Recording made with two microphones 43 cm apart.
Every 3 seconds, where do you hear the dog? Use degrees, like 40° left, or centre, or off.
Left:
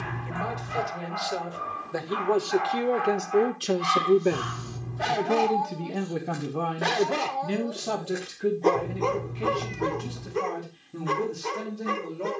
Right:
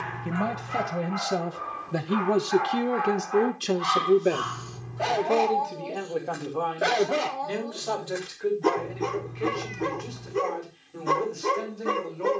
50° left, 40° left, centre, 50° right.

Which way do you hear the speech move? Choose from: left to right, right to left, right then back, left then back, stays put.
right to left.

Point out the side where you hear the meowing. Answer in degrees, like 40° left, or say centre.
50° left.